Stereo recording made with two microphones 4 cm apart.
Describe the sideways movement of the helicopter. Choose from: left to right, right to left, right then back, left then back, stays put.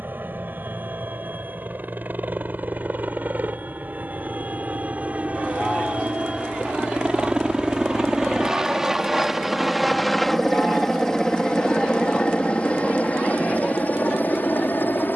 right to left.